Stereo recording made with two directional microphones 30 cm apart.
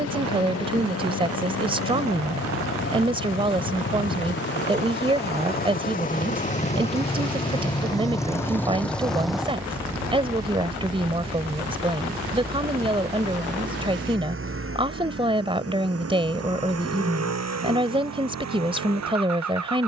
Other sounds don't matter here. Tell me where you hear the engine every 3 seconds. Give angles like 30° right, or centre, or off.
50° left, 40° left, 20° left, 10° right, 40° right, 50° right, 60° right.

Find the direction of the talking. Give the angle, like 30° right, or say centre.
20° right.